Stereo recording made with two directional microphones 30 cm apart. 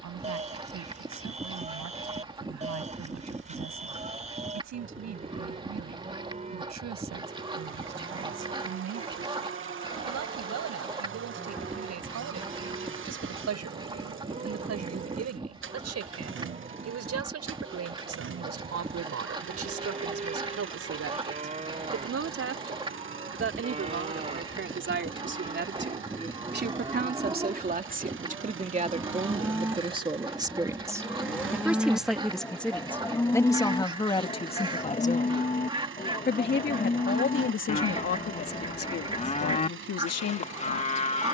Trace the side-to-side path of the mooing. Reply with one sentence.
You can hear the mooing go from the right side to the left.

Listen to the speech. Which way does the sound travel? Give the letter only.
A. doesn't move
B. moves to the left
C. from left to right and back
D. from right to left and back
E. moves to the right
B.